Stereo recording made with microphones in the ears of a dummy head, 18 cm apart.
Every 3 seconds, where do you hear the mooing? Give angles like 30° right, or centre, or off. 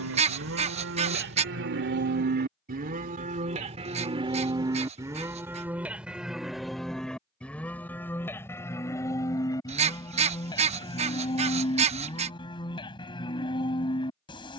60° right, 20° right, 10° left, 20° left, 20° left.